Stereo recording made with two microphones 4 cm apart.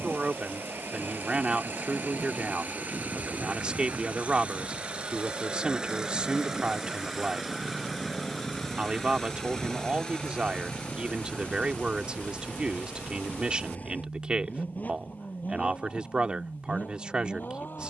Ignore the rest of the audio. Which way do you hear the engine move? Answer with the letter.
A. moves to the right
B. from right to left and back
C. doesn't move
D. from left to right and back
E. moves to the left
E.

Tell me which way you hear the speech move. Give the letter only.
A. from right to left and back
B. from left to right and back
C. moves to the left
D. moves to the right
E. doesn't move
E.